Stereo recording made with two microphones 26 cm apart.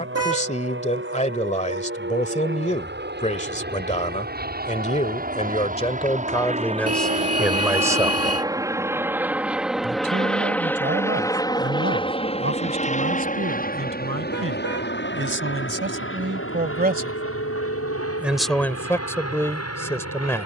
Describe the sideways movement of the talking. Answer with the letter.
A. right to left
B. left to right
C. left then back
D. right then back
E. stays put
D.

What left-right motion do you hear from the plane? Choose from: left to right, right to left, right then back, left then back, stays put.
right to left.